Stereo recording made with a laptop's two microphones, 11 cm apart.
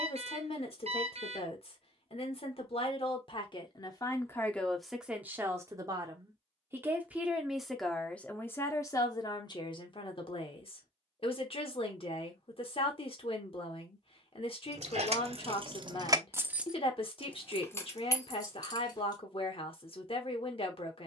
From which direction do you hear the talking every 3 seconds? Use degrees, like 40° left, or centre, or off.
60° left, 10° left, centre, 50° left, 50° left, 50° left, 50° left.